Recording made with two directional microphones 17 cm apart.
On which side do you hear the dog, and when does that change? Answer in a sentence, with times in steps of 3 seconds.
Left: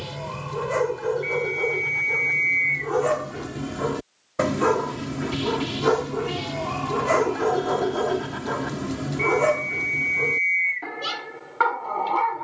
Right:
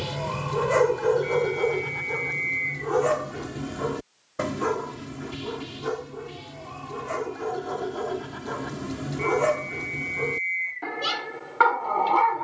You can hear the dog in the centre from 0 s, on the left from 3 s and in the centre from 9 s.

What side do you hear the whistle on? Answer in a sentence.
In this clip you hear the whistle on the left.